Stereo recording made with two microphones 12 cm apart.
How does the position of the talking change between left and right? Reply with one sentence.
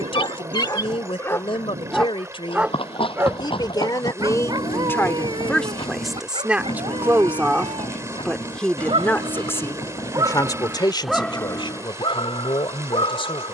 In this clip you hear the talking go right and come back.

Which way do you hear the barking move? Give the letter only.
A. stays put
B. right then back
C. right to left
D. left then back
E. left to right
B.